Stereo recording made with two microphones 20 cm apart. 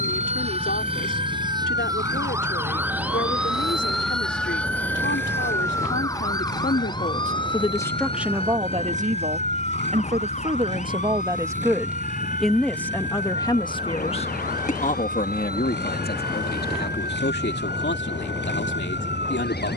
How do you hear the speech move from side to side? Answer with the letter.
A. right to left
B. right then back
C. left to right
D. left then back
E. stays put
B.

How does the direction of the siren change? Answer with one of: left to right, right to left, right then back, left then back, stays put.
right to left.